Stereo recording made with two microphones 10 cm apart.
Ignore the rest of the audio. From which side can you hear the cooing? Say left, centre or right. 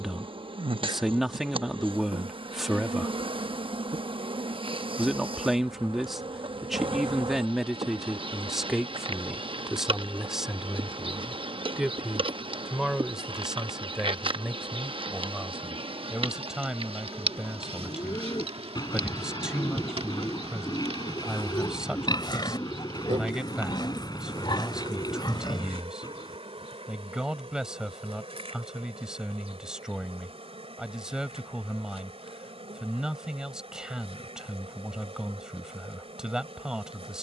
left.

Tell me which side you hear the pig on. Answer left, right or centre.
left.